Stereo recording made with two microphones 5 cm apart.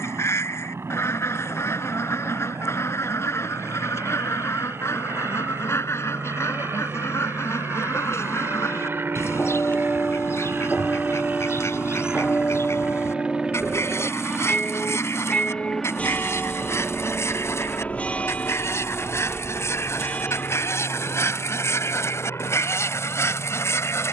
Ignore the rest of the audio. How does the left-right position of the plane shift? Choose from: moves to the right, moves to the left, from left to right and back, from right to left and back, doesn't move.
moves to the left.